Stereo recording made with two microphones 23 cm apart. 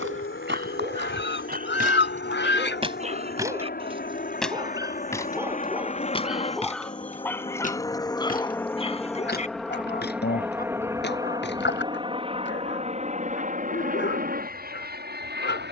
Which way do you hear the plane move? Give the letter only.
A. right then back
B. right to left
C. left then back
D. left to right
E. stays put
D.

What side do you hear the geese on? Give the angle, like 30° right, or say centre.
50° left.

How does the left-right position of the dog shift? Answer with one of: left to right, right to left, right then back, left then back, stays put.
right to left.